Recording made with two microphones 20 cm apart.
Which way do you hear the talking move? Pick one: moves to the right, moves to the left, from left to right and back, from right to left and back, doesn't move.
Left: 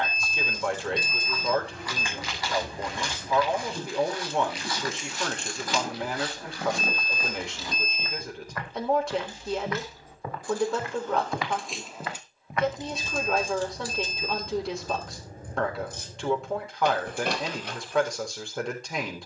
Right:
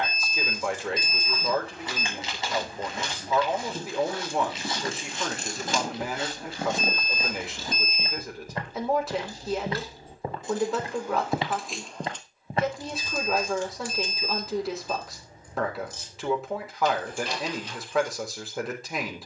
doesn't move.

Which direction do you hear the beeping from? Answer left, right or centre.
centre.